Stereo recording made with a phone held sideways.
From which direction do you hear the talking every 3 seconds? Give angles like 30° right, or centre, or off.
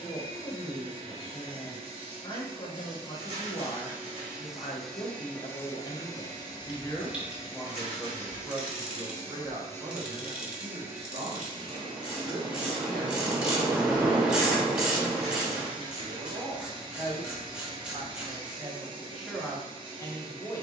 30° left, 30° left, 10° left, 30° right, 50° right, 50° right, centre.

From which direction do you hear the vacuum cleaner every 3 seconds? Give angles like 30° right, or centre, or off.
40° right, centre, 40° left, centre, 30° right, 30° right, 30° right.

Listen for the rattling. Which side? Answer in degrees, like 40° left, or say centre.
30° right.